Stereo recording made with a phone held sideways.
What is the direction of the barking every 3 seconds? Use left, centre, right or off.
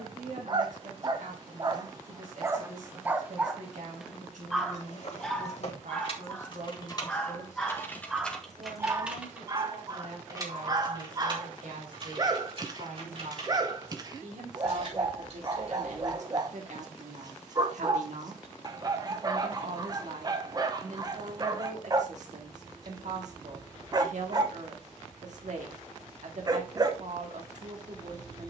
right, centre, centre, right, right, right, right, right, right, right.